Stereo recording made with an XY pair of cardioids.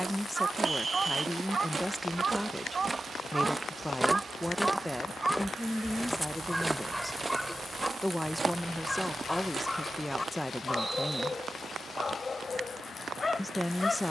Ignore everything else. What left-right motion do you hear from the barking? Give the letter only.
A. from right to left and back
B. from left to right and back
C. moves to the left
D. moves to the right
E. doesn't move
C.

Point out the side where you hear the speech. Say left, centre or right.
centre.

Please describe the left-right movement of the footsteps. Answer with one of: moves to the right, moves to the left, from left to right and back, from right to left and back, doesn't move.
from right to left and back.